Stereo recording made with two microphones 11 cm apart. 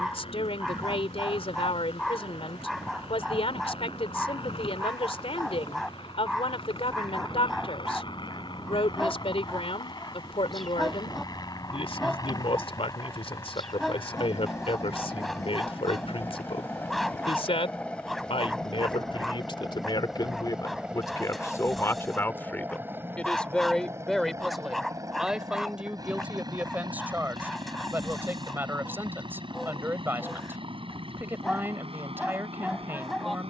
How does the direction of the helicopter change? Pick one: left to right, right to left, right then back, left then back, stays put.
left to right.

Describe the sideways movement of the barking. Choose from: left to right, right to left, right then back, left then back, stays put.
stays put.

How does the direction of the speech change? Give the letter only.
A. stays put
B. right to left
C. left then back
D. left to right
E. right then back
D.